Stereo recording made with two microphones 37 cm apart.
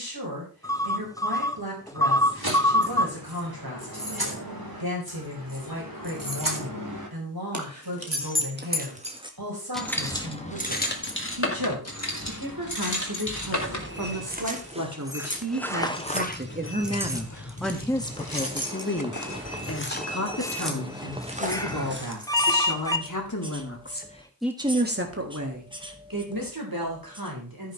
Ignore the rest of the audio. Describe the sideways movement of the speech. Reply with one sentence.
In this clip you hear the speech go left and come back.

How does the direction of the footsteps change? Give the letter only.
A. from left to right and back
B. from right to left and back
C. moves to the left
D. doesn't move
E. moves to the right
B.